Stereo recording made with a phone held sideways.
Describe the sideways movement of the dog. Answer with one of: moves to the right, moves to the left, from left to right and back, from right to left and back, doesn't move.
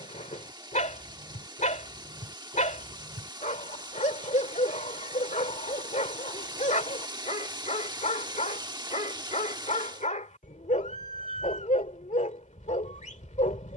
doesn't move.